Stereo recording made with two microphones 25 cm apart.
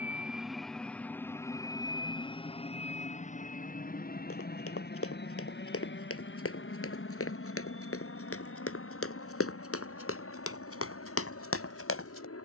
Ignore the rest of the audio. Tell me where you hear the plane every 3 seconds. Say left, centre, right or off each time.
centre, left, left, left.